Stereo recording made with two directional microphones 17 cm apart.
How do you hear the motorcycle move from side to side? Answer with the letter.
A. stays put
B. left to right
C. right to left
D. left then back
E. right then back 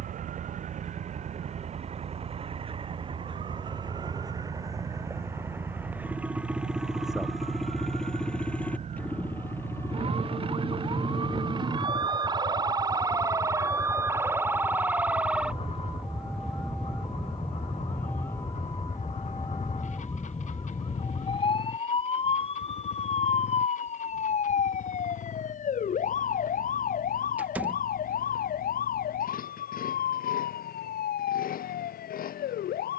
C.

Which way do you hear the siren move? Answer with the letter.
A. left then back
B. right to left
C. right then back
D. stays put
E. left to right
B.